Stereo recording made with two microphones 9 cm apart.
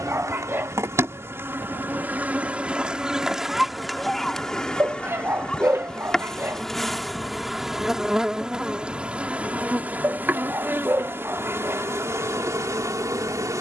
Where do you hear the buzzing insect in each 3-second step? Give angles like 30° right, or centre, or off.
30° right, centre, centre, 20° right, 40° right.